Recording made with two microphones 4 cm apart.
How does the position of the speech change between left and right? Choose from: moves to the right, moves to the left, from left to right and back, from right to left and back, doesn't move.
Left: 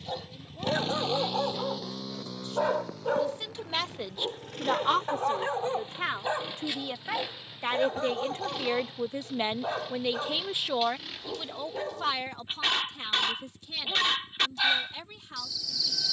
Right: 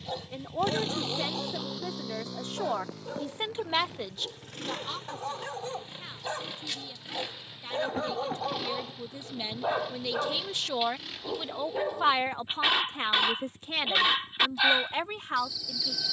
from right to left and back.